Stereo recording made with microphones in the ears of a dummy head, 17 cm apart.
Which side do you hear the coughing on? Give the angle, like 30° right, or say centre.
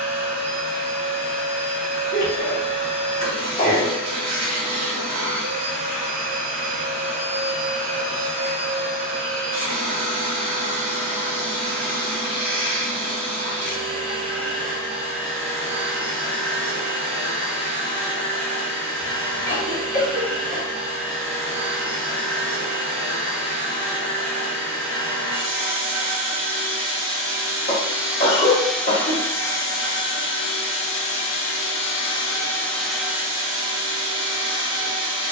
40° left.